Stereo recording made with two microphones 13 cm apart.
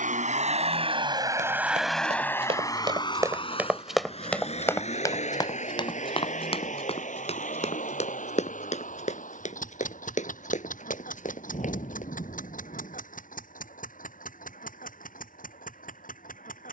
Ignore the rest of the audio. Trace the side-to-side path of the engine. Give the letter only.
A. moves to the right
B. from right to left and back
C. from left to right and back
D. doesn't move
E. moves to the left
E.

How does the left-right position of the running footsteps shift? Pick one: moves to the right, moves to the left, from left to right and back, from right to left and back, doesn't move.
moves to the left.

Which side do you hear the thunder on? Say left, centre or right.
left.